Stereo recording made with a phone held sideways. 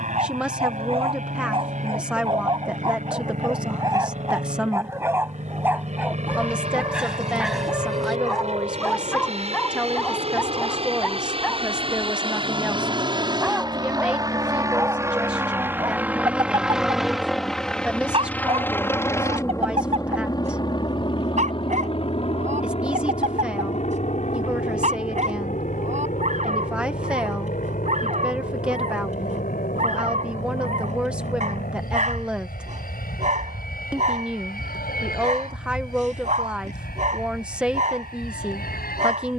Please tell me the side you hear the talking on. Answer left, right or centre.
centre.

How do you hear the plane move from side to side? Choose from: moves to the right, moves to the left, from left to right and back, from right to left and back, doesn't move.
moves to the left.